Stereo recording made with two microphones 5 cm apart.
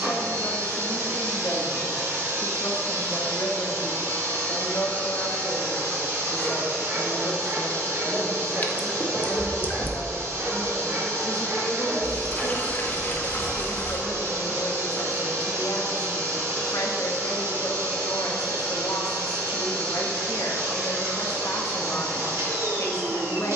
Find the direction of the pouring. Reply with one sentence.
You can hear the pouring on the left.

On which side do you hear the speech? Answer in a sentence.
You can hear the speech on the left.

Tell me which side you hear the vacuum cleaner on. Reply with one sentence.
You can hear the vacuum cleaner on the right.